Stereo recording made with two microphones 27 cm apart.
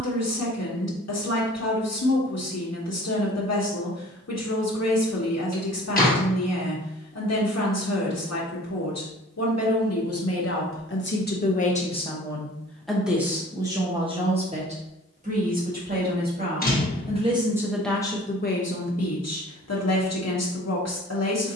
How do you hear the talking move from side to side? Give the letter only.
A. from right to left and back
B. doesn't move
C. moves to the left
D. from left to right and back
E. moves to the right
D.